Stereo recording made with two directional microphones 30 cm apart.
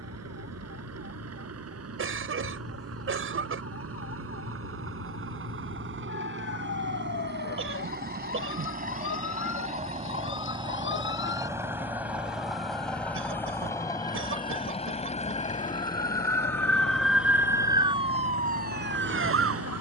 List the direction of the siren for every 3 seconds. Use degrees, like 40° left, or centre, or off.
50° left, 50° left, 40° left, 40° left, 30° left, 10° left, 30° right.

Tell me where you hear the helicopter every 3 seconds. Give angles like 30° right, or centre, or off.
50° right, 50° right, 30° right, 20° right, 10° left, 30° left, 40° left.